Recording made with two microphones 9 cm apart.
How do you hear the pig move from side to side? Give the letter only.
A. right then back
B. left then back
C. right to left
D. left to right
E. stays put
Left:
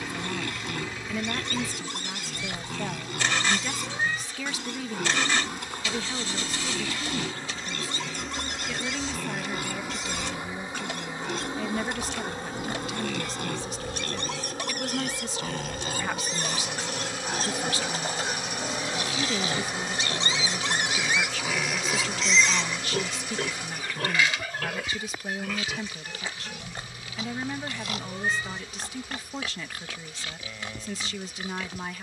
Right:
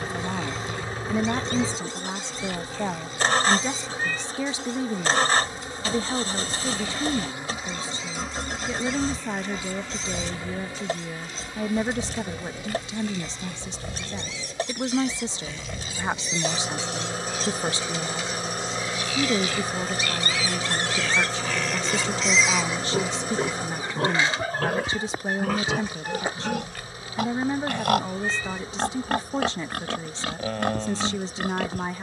D.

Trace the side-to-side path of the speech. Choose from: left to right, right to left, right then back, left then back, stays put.
stays put.